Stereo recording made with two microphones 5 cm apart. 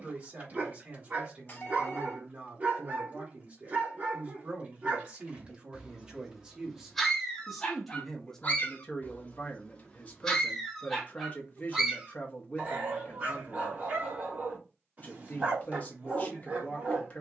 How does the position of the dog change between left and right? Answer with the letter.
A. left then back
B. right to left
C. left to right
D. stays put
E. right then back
A.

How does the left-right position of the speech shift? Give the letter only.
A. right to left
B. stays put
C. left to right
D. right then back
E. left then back
A.